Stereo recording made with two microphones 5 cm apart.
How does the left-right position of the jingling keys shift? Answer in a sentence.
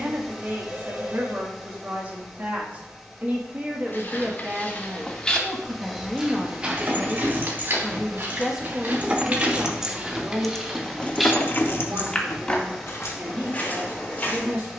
In this clip you hear the jingling keys go from the right side to the left.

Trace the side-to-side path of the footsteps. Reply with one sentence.
In this clip you hear the footsteps go right and come back.